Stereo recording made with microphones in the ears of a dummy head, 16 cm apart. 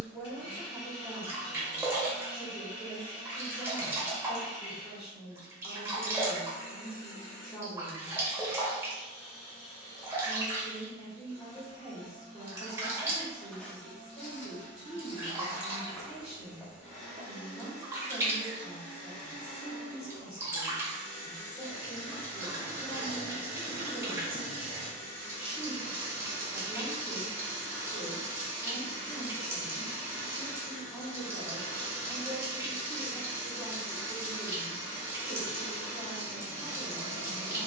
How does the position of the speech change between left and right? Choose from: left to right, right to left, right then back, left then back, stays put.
stays put.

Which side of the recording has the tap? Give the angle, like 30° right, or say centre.
10° right.